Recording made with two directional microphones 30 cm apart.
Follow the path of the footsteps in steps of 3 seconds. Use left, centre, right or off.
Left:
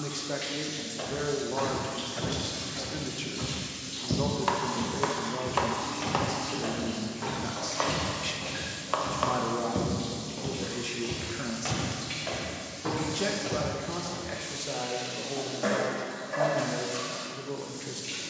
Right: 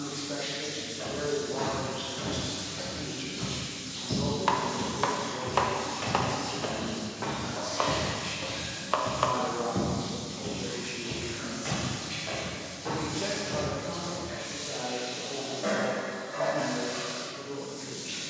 left, left, centre, left, left, off.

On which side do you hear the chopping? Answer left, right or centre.
centre.